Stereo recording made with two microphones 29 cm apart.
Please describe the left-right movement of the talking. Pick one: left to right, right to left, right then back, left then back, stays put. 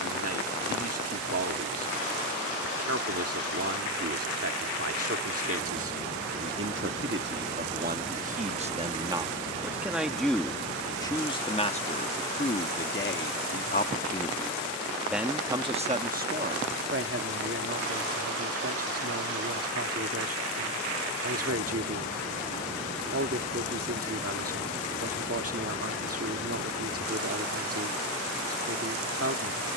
left then back.